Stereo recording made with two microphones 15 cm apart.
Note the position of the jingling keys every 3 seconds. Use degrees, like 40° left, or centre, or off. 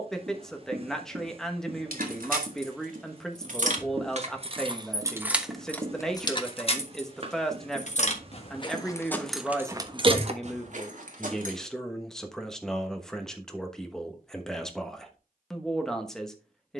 70° right, 30° right, 40° left, 40° right, off, off.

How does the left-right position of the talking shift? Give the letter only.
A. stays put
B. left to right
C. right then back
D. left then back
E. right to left
A.